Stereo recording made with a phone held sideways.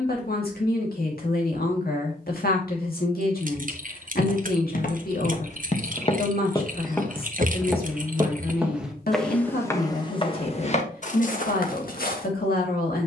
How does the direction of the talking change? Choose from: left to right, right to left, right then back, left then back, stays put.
stays put.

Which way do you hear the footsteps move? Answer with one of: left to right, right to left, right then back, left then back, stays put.
right then back.